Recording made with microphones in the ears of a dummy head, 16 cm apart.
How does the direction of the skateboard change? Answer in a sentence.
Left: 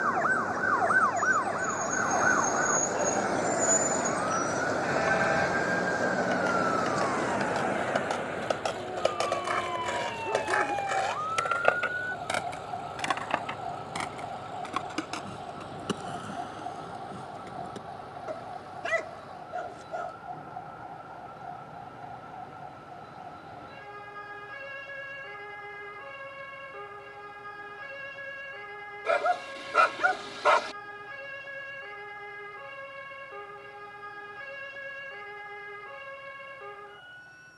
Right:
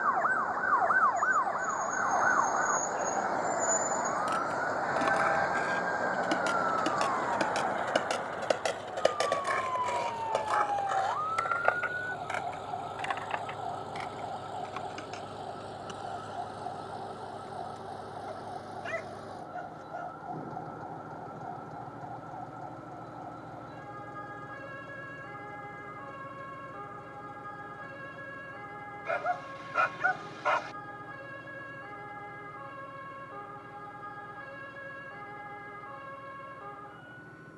You can hear the skateboard move to the left.